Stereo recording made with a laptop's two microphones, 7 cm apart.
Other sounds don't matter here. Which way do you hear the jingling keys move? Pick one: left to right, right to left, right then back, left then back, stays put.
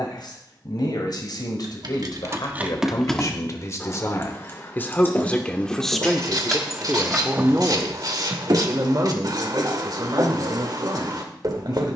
left then back.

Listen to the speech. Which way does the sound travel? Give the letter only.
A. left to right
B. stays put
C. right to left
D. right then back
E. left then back
A.